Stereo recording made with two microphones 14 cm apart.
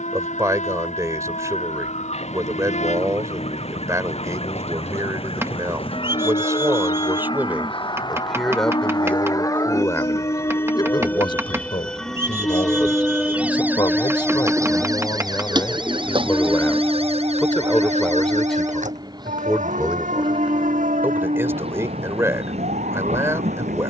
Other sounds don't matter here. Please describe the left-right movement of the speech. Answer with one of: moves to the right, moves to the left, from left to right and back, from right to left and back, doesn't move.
from right to left and back.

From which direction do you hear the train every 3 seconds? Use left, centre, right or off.
left, left, left, left, centre, centre, right, right.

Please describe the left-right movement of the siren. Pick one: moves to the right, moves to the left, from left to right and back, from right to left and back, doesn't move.
moves to the right.